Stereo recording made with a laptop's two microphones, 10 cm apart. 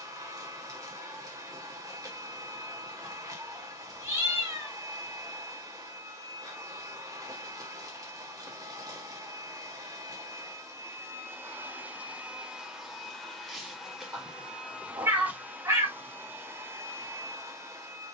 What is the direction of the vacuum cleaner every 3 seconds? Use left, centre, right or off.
right, right, right, right, centre, right.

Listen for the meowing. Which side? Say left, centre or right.
right.